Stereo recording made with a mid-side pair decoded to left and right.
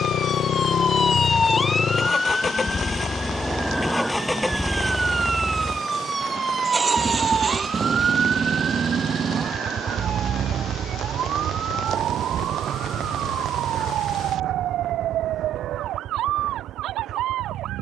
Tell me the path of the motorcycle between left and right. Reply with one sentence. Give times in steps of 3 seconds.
In this clip you hear the motorcycle on the left from 0 s, in the centre from 3 s and on the right from 6 s.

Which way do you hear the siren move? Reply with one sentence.
In this clip you hear the siren travel towards the right.